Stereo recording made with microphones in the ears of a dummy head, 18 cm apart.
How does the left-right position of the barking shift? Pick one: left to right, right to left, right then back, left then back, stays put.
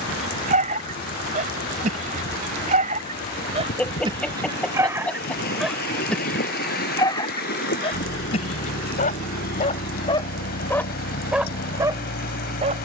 left then back.